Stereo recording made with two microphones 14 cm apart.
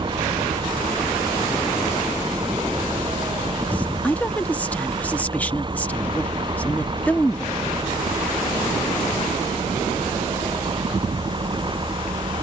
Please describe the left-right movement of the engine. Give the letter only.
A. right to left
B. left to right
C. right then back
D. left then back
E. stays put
E.